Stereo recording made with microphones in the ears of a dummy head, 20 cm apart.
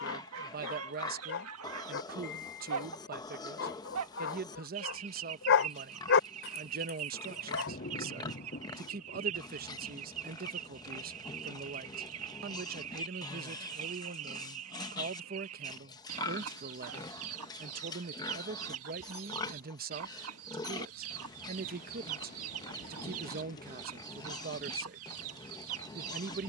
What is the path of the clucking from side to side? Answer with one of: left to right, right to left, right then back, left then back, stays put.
stays put.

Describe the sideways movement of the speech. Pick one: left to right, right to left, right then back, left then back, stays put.
stays put.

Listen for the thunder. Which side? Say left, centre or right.
left.